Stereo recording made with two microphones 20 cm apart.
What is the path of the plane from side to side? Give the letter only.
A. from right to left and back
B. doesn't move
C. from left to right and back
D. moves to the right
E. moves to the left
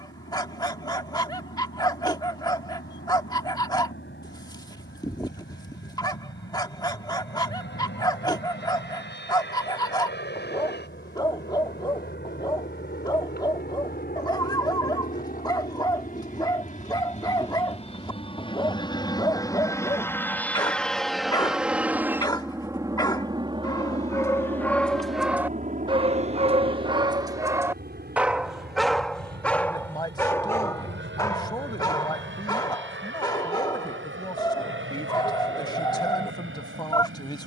D.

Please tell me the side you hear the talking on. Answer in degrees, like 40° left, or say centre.
20° left.